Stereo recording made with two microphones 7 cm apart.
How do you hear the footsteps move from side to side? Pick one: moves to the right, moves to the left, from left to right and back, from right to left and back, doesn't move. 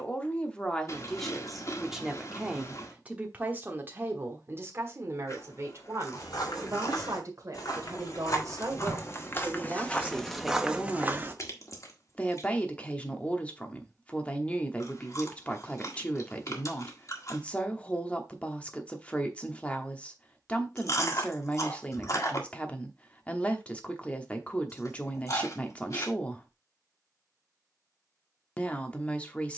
moves to the right.